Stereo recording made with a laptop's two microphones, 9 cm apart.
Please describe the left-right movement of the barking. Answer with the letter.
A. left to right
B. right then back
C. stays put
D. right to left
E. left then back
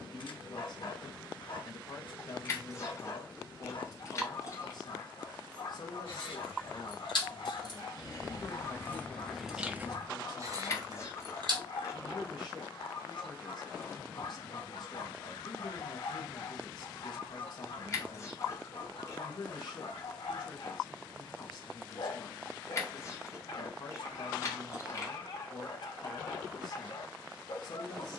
C.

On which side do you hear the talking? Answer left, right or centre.
left.